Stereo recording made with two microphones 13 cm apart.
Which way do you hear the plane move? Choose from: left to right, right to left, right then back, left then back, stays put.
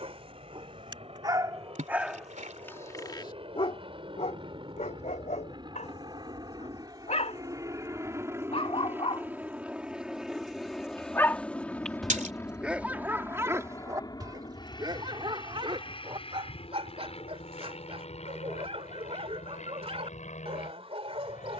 right to left.